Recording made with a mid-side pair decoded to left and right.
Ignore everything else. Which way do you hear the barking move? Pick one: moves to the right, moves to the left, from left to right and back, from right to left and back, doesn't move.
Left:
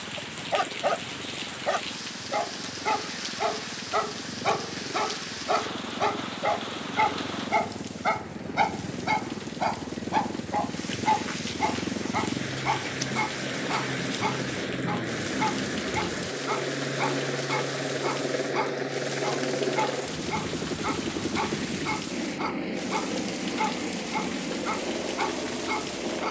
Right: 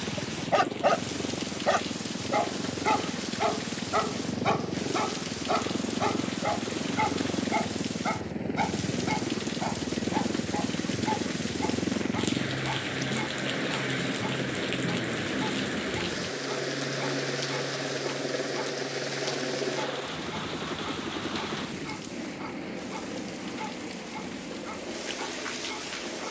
moves to the left.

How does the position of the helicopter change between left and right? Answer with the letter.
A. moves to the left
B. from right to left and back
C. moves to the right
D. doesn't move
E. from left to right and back
A.